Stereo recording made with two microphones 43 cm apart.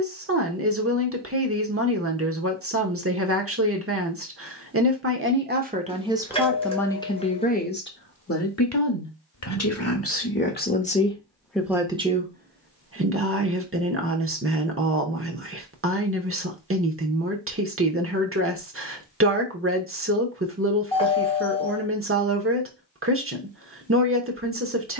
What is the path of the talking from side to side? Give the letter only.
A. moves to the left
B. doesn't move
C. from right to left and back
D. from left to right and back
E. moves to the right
C.